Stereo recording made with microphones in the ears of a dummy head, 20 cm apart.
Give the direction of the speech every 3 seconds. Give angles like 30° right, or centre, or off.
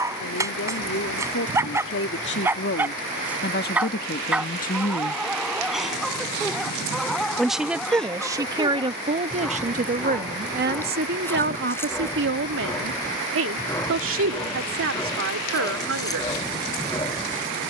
60° left, 40° left, 10° right, 40° right, 60° right, 70° right.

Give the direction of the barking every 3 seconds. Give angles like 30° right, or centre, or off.
10° right, centre, centre, 10° left, 10° left, 20° left.